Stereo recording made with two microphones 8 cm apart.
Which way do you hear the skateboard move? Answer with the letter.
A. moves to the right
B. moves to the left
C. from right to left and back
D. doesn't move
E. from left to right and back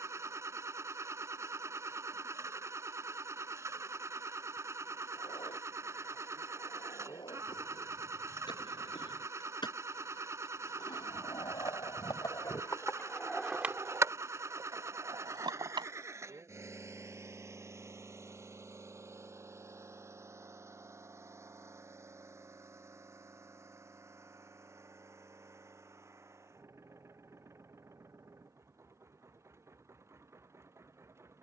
A.